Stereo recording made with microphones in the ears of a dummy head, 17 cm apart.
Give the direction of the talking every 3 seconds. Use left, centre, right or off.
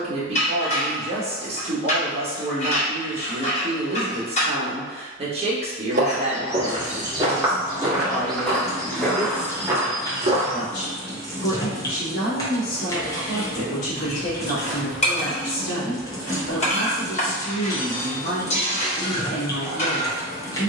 right, right, centre, left, left, left, left.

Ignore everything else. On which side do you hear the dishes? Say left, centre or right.
left.